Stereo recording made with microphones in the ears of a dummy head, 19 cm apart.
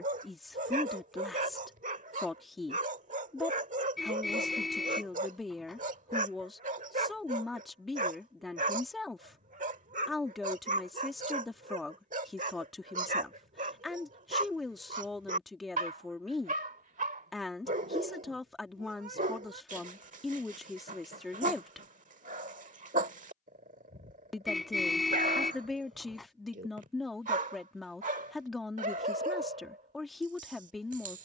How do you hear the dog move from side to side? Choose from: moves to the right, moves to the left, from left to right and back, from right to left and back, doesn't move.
doesn't move.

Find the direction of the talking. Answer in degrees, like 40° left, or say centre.
centre.